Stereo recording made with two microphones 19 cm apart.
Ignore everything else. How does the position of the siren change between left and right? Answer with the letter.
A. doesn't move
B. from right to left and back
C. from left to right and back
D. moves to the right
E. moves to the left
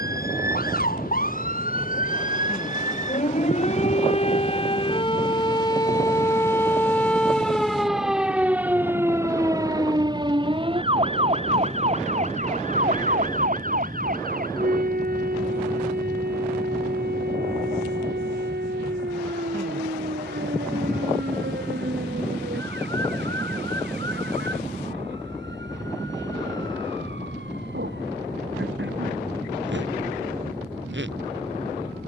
D.